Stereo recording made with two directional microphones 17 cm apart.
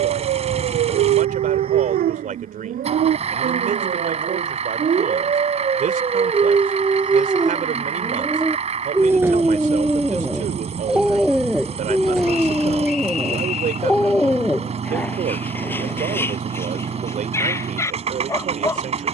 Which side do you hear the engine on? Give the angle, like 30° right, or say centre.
40° right.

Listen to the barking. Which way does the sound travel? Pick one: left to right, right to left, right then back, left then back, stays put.
right to left.